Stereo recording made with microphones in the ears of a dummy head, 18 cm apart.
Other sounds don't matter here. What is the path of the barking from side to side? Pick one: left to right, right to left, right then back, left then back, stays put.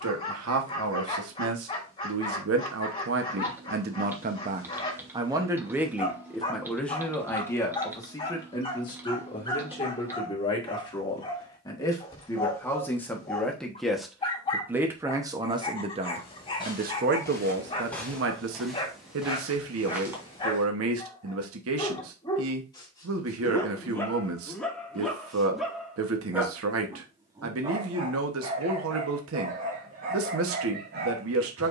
left to right.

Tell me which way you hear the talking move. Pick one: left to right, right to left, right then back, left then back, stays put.
left then back.